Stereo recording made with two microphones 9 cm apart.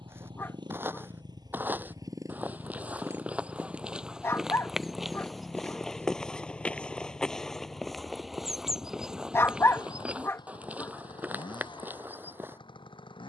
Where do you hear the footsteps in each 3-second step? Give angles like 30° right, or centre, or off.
20° right, centre, 10° left, 10° right, 20° right.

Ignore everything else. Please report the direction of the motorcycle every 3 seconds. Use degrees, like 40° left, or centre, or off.
50° right, centre, 30° left, 60° left, 60° left.